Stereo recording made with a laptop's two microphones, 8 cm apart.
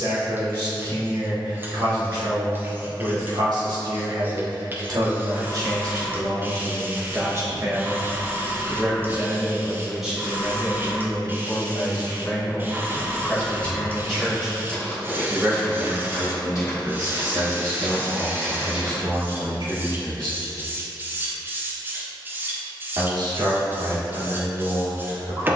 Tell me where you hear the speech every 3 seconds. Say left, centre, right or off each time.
right, right, right, centre, centre, right, right, right, right.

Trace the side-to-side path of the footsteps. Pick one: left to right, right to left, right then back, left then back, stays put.
left then back.